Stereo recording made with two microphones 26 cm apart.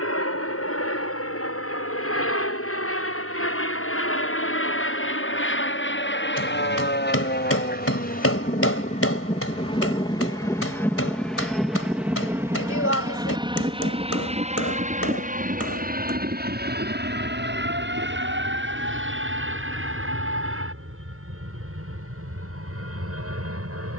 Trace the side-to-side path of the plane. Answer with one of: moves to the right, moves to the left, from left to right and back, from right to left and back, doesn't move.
moves to the right.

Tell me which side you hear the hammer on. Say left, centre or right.
left.